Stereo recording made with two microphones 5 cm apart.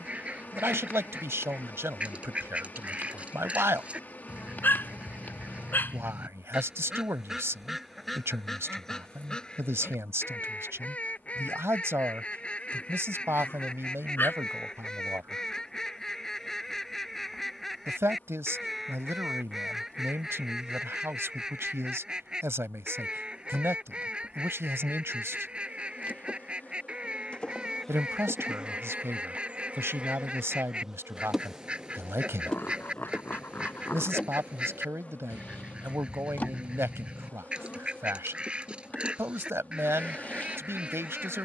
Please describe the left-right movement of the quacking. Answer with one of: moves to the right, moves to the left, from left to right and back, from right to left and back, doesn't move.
from right to left and back.